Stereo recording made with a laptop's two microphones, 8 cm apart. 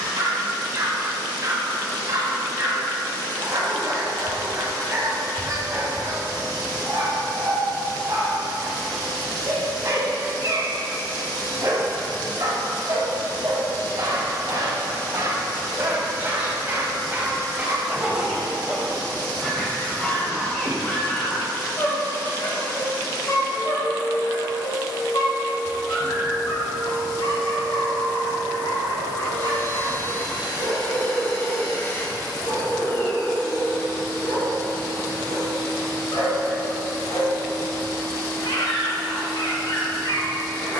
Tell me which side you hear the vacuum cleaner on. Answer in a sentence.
In this clip you hear the vacuum cleaner on the left.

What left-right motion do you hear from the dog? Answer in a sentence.
In this clip you hear the dog go from the right side to the left.